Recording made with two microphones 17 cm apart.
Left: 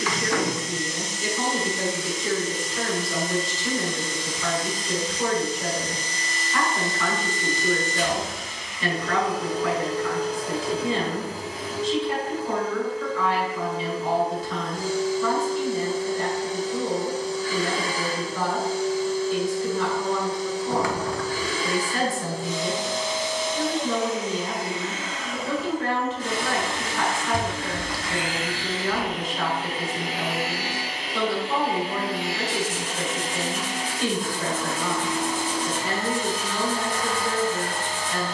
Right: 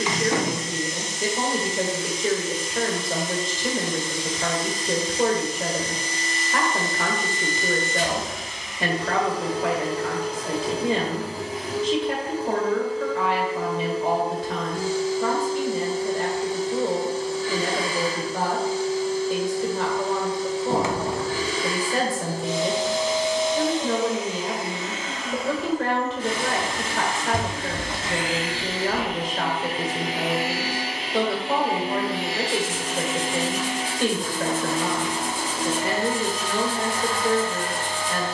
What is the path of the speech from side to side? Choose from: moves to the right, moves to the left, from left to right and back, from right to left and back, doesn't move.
doesn't move.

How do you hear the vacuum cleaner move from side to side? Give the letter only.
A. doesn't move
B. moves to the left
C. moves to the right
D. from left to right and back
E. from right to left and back
A.